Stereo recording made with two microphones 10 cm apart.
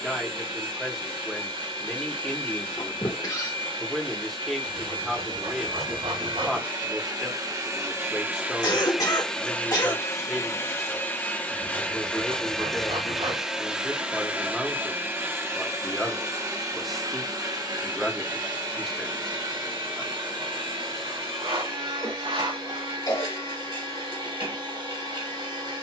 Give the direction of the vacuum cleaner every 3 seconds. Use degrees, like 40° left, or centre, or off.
60° right, 60° right, 40° right, 20° left, 10° right, 40° right, 50° right, 60° right, 60° right.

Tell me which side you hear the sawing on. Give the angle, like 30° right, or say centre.
80° right.